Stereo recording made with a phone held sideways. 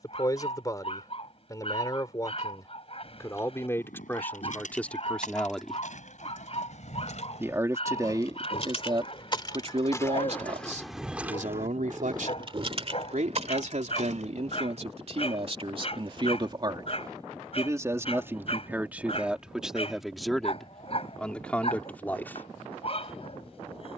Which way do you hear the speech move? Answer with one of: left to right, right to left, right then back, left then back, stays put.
right then back.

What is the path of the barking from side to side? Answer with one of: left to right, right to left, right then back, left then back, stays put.
stays put.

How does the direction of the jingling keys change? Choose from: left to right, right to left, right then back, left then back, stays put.
left to right.